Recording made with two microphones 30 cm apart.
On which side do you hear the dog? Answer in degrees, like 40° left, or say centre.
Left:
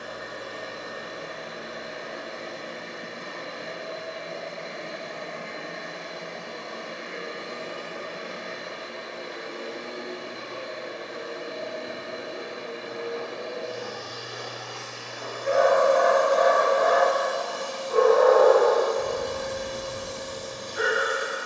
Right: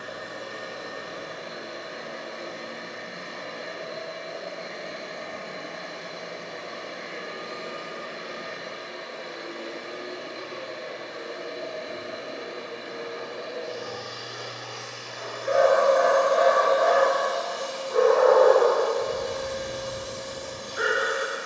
70° left.